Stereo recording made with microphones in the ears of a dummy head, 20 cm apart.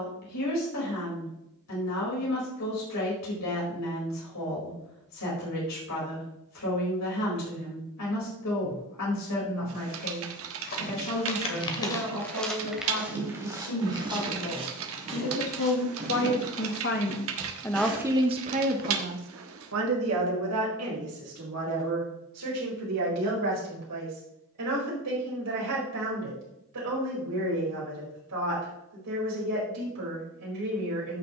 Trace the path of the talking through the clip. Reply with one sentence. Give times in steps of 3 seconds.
You can hear the talking on the left from 0 s and on the right from 18 s.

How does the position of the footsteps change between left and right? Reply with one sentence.
You can hear the footsteps go from the left side to the right.